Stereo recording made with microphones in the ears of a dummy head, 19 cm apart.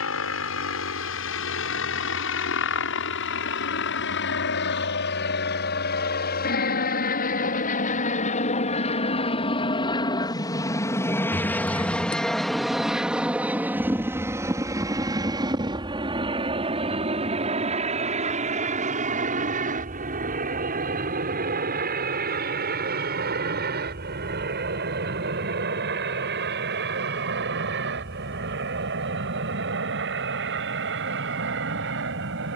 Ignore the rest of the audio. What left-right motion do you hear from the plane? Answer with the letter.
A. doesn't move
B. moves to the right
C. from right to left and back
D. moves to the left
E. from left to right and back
B.